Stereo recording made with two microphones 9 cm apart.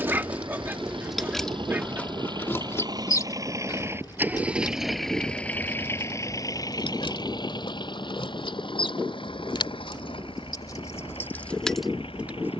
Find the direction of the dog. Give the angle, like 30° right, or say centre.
20° right.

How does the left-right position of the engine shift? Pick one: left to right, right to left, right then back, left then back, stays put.
right to left.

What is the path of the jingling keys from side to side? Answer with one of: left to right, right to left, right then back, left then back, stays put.
left then back.